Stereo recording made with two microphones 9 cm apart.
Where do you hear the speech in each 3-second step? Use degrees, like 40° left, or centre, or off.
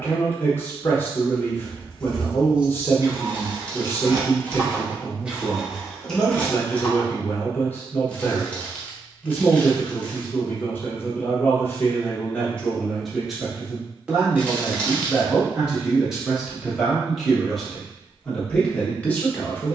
20° left, 20° left, 20° left, 20° left, centre, centre, 10° left.